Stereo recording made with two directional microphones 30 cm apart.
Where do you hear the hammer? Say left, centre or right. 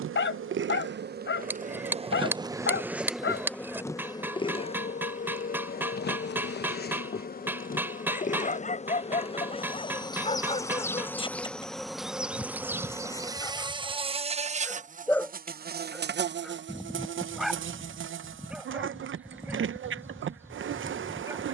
centre.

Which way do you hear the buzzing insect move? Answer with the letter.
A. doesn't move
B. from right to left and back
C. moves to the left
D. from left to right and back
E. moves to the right
B.